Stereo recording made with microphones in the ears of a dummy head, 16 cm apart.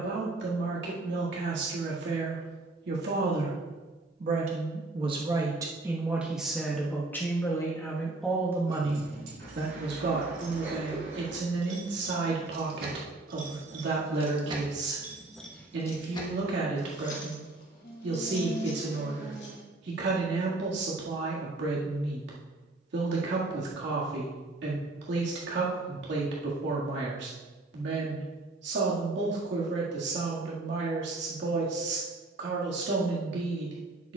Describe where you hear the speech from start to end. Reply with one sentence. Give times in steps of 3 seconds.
In this clip you hear the speech on the right from 0 s, in the centre from 6 s and on the right from 9 s.